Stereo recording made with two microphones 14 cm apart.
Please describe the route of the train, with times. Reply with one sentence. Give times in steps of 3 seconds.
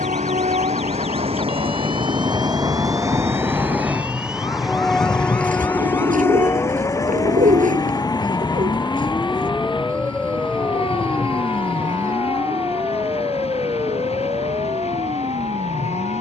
In this clip you hear the train on the right from 0 s, in the centre from 3 s and on the left from 6 s.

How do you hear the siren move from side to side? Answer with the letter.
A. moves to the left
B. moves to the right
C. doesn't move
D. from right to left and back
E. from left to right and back
B.